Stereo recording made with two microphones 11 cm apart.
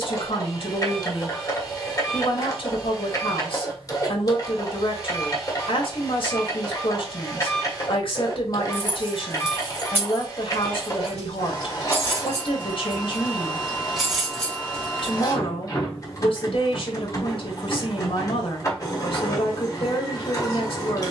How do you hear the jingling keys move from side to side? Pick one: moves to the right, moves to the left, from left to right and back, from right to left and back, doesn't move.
from left to right and back.